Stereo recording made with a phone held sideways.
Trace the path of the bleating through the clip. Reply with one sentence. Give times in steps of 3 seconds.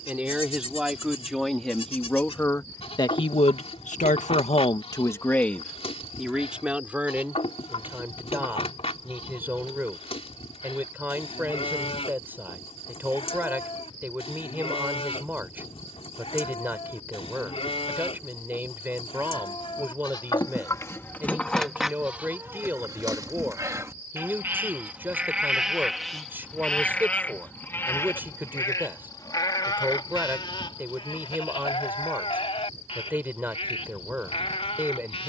In this clip you hear the bleating on the left from 0 s, in the centre from 21 s and on the left from 27 s.